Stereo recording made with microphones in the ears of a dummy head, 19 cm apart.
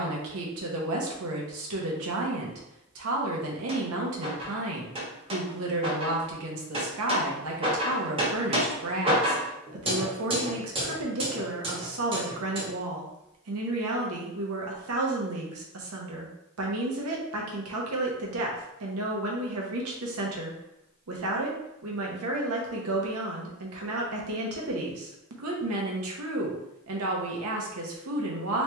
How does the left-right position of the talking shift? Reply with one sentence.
In this clip you hear the talking stay in one place.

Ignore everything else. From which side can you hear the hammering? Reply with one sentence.
In this clip you hear the hammering on the right.